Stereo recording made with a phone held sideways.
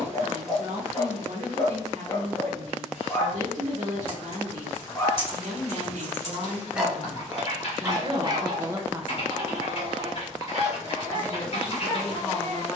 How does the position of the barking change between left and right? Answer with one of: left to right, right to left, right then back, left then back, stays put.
left to right.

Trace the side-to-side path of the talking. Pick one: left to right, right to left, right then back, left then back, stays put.
right to left.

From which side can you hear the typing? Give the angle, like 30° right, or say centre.
50° left.